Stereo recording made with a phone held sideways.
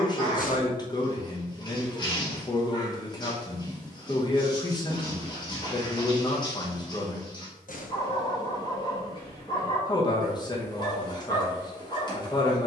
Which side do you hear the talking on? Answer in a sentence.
In this clip you hear the talking on the left.